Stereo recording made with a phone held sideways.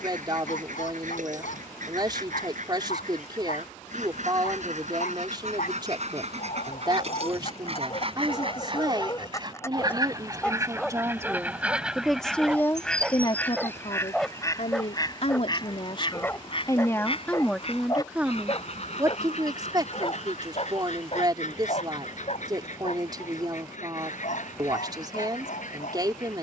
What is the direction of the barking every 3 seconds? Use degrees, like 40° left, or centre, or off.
70° left, 70° left, 50° left, 10° left, centre, 20° left, 40° left, 50° left, 70° left.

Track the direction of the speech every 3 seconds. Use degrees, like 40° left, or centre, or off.
30° right, 30° right, 30° right, 30° right, 30° left, 30° left, 20° right, 30° right, 30° right.